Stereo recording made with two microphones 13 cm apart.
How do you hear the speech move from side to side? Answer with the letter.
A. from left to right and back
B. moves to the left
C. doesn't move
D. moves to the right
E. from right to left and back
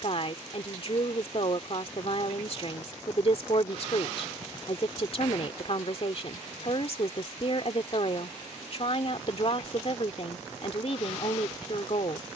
C.